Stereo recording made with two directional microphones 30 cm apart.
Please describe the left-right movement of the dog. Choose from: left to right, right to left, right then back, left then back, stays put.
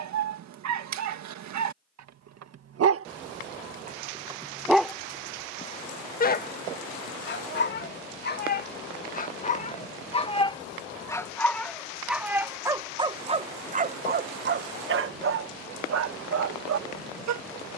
left then back.